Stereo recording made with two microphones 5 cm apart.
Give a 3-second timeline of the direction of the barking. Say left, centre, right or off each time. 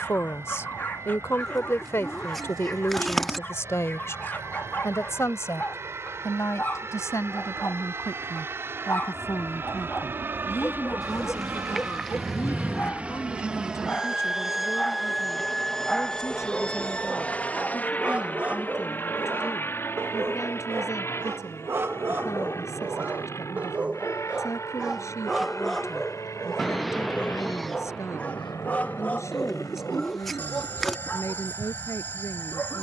left, left, left, left, left, centre, right, right, centre, left, left.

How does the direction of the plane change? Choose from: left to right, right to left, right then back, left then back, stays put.
right to left.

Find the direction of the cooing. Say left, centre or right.
centre.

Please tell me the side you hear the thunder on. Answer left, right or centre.
centre.